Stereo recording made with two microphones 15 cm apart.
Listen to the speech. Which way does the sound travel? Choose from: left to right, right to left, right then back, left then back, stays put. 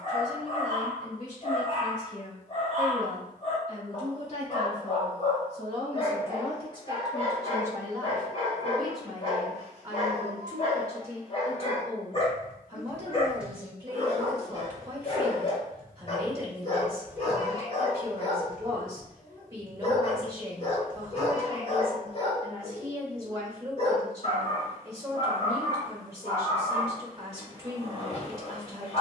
left to right.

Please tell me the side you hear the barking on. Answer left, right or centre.
left.